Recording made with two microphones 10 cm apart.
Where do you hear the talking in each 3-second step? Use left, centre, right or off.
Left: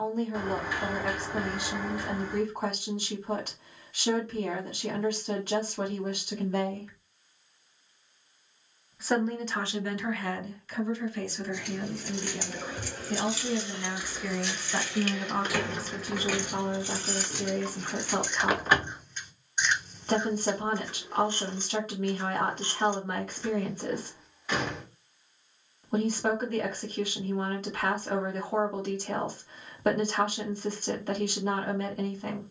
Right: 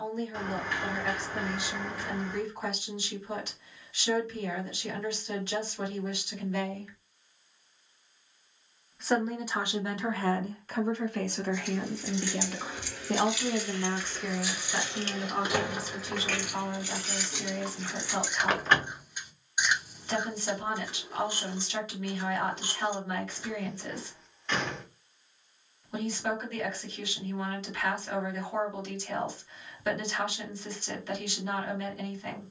left, left, left, right, right, left, left, left, left, left, left.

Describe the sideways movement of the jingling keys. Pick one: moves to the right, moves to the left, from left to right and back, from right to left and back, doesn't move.
from left to right and back.